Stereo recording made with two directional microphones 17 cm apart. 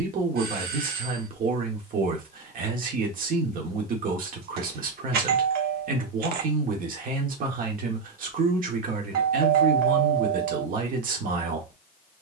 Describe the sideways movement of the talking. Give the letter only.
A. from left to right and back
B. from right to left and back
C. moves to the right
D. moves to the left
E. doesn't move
E.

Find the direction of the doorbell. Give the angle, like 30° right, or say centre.
70° right.